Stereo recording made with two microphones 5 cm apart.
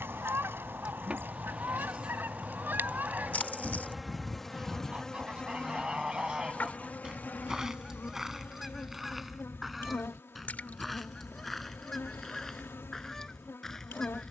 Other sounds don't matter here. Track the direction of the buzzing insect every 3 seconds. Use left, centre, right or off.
right, centre, left, left, left.